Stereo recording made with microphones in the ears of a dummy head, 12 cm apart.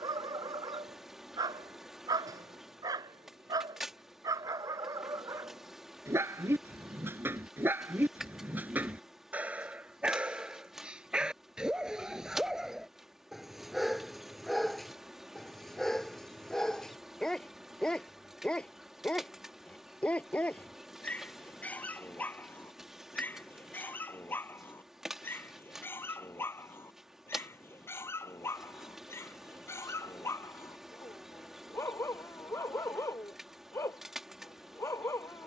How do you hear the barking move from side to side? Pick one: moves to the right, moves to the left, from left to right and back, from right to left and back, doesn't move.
moves to the left.